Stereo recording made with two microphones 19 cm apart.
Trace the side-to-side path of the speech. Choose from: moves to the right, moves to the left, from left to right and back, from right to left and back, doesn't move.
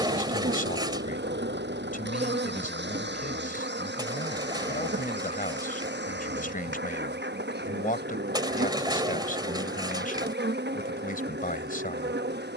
doesn't move.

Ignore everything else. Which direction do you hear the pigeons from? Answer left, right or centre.
right.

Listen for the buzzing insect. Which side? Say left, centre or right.
right.